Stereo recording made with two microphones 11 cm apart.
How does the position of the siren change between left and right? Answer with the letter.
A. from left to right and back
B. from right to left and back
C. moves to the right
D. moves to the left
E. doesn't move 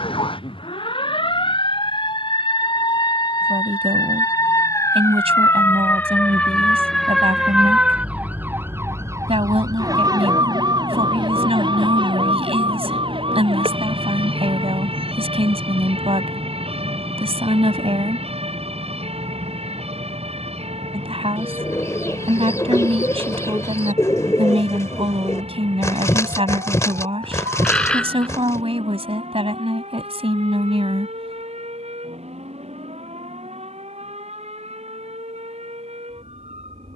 C.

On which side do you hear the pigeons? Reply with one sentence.
In this clip you hear the pigeons on the left.